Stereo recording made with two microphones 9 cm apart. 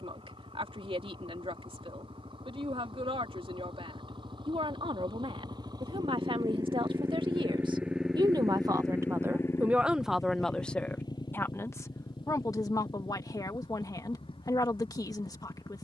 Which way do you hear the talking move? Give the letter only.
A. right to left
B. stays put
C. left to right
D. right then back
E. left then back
A.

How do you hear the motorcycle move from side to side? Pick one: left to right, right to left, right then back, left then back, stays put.
right to left.